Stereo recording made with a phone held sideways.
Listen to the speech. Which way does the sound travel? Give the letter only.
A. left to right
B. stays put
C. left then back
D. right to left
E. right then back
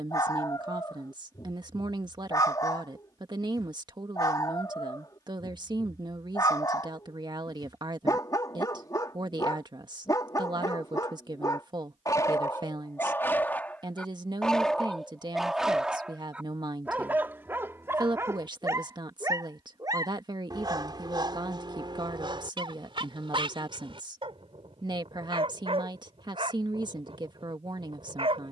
B.